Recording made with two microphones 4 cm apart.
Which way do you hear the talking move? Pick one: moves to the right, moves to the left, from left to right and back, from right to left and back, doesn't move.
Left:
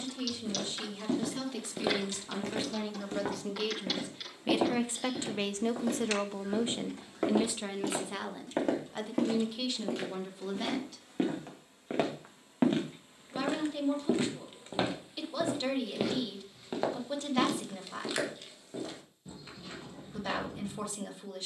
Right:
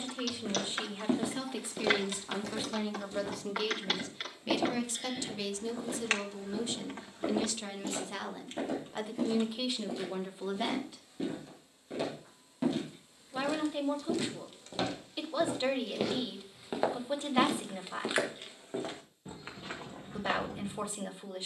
from right to left and back.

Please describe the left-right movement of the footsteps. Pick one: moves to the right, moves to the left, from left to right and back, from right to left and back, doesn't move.
from right to left and back.